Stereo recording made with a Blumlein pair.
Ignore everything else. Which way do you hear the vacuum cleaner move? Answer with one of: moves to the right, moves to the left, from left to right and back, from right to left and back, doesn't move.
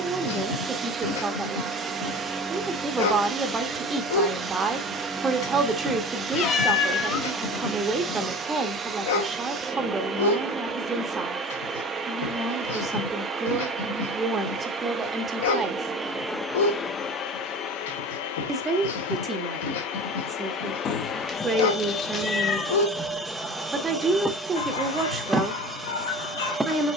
from right to left and back.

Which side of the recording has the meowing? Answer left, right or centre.
left.